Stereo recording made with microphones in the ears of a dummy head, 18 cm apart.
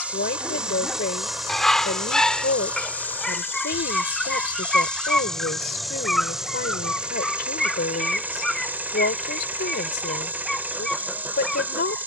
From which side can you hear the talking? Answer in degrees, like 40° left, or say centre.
50° left.